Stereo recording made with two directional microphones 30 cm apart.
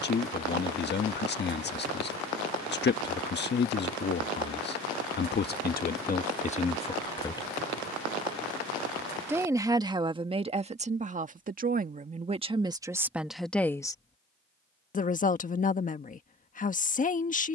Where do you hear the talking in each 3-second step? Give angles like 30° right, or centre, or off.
30° left, 30° left, 20° left, 20° right, centre, 30° left.